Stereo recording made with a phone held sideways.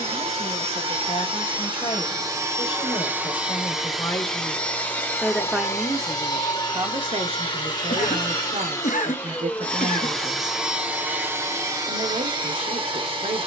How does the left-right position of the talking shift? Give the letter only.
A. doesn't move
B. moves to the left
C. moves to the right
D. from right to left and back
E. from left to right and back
C.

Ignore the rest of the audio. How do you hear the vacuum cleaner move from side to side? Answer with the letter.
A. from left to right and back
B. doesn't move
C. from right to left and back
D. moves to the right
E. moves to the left
C.